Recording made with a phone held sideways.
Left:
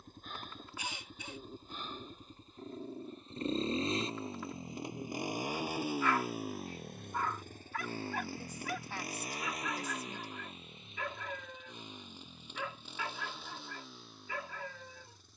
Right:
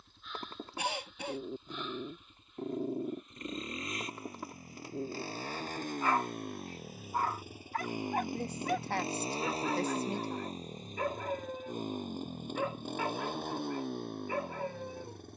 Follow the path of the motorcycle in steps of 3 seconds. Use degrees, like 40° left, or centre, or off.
40° left, 20° left, 10° right, 40° right, 60° right.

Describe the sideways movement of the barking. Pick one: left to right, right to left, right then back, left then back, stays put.
stays put.